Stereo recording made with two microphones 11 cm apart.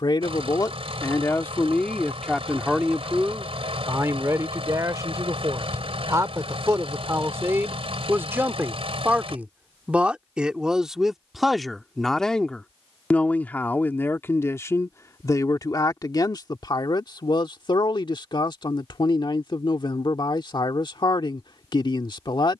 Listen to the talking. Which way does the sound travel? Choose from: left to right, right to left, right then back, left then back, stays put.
right then back.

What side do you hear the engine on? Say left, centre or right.
right.